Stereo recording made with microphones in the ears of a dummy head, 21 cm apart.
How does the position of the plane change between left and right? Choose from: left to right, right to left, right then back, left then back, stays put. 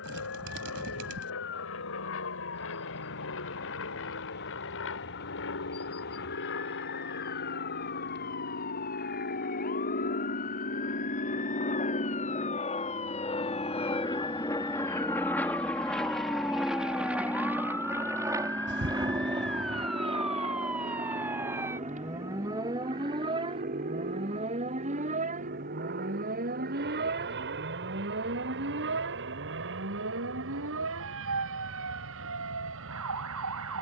left to right.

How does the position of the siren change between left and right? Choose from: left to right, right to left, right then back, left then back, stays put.
left to right.